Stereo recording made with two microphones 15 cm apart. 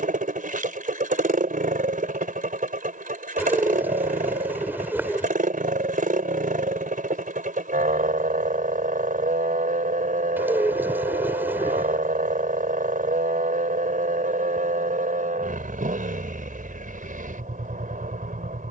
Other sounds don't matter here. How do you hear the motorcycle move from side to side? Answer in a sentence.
In this clip you hear the motorcycle stay put.